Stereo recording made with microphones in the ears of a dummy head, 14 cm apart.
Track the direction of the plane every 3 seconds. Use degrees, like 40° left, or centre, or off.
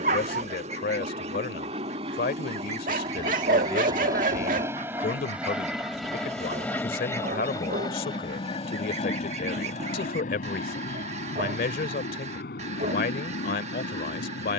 40° right, 20° right, 20° left, 50° left, 70° left.